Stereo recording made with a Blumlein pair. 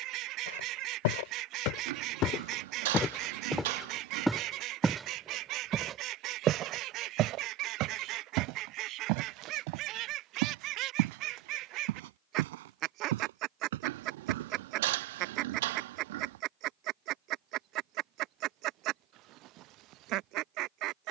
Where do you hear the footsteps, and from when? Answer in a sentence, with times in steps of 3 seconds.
You can hear the footsteps on the left from 0 s, in the centre from 3 s, on the right from 6 s and not at all from 15 s.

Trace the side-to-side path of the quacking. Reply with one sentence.
You can hear the quacking stay in one place.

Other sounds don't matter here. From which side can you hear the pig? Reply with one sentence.
You can hear the pig on the right.